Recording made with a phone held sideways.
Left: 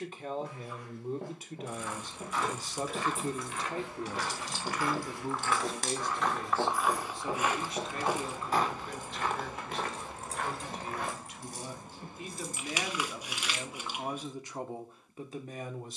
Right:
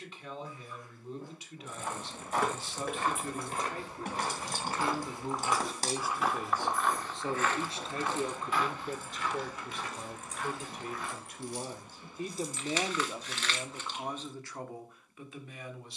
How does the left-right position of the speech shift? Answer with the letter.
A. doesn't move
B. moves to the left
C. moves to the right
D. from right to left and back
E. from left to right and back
E.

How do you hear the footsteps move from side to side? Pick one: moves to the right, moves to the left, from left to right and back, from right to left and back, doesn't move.
moves to the left.